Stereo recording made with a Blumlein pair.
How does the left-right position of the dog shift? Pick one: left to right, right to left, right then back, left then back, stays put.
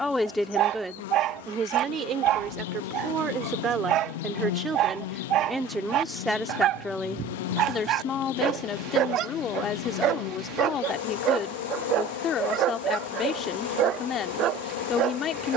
stays put.